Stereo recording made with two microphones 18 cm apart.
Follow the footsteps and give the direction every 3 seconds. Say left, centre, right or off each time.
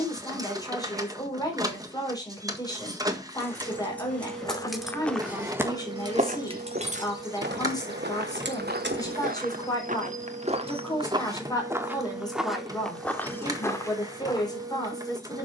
off, centre, right, right, centre.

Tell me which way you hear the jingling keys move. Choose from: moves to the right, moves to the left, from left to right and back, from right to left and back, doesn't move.
moves to the right.